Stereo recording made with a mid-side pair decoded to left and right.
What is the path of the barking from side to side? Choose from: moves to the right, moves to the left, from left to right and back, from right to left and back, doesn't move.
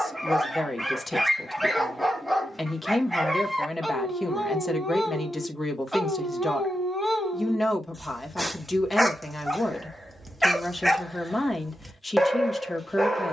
doesn't move.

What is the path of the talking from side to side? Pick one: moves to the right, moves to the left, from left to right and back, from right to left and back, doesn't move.
doesn't move.